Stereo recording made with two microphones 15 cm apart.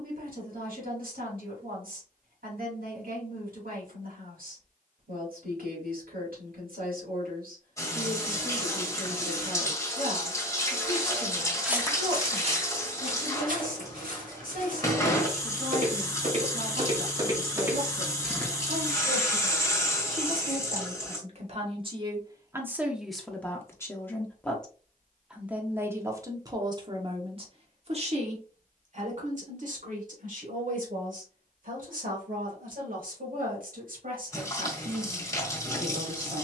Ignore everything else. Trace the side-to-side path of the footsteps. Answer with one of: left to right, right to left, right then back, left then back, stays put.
right then back.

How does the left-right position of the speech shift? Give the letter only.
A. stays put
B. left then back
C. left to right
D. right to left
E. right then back
B.